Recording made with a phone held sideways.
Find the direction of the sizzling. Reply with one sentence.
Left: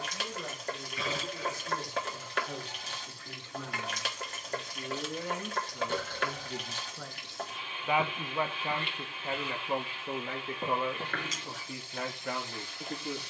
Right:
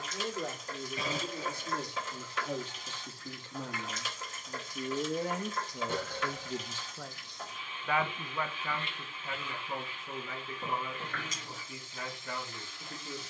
You can hear the sizzling on the left.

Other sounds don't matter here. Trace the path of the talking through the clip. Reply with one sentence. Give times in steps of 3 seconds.
You can hear the talking on the right from 0 s, in the centre from 6 s and on the left from 9 s.